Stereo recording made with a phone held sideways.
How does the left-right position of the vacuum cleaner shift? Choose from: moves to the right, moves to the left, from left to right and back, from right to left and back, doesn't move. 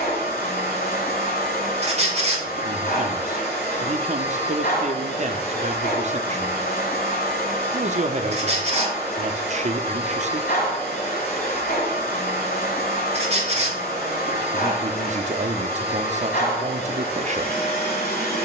doesn't move.